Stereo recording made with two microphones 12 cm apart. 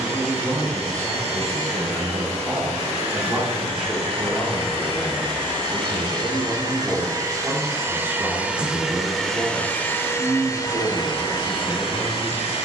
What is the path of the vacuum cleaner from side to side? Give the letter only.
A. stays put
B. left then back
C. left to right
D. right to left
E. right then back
D.